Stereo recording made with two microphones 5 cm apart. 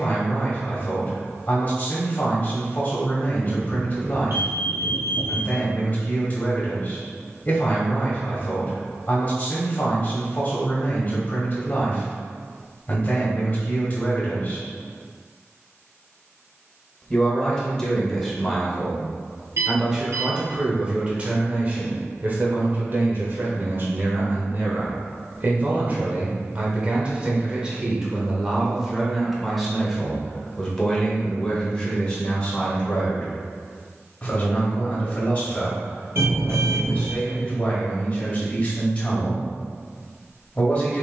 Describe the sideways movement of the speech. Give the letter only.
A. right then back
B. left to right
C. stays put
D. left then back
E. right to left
A.